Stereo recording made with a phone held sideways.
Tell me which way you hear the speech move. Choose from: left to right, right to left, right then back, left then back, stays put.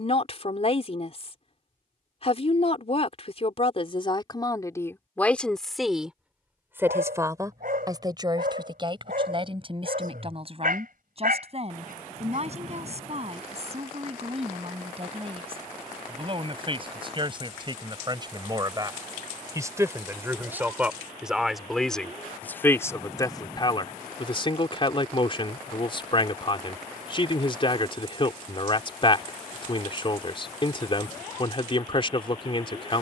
right then back.